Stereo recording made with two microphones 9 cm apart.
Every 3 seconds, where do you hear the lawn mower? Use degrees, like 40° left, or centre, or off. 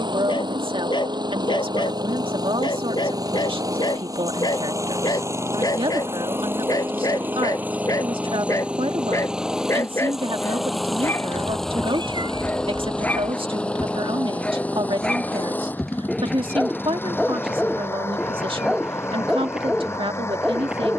50° right, 40° right, 20° right, centre, 10° left, 20° left, 30° left.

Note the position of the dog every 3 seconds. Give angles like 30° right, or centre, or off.
60° left, 50° left, 40° left, 30° left, 20° left, centre, 10° right.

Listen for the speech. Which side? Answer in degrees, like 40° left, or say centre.
80° right.